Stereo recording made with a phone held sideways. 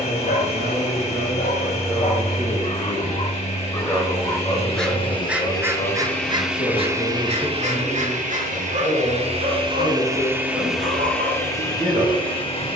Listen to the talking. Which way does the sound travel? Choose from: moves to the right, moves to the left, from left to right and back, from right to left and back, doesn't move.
from right to left and back.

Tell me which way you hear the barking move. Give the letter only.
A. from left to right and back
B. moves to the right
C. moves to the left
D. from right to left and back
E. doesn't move
B.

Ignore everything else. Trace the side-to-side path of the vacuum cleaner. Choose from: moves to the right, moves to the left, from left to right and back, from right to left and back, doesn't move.
from left to right and back.